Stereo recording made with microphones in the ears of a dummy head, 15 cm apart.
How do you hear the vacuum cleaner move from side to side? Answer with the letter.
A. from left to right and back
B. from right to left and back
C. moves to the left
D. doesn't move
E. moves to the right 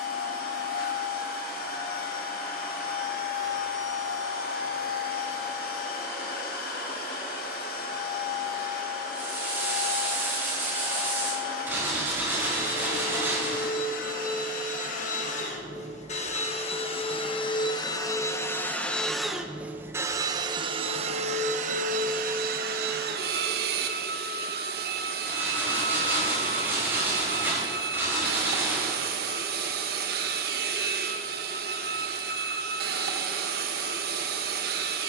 E.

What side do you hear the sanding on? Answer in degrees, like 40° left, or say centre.
10° right.